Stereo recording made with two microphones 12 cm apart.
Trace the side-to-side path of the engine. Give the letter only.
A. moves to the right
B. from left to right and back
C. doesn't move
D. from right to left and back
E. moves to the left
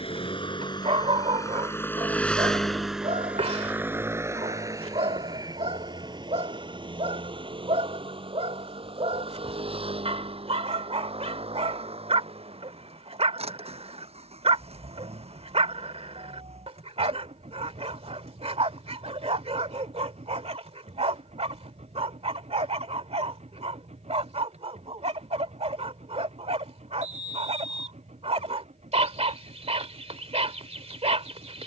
A.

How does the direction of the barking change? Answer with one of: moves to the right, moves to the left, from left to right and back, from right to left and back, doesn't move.
doesn't move.